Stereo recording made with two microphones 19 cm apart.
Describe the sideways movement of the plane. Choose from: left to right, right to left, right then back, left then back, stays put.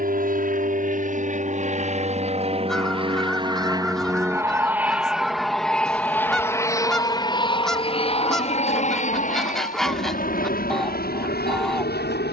right to left.